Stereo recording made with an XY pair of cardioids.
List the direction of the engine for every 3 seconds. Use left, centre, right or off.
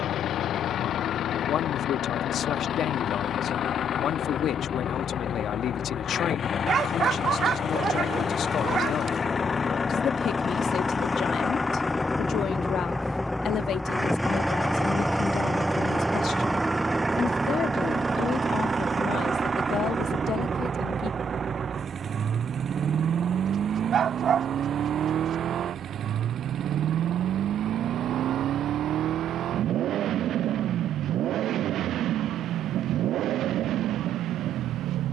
left, left, left, left, centre, centre, right, right, right, right, right, right.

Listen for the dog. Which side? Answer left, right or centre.
right.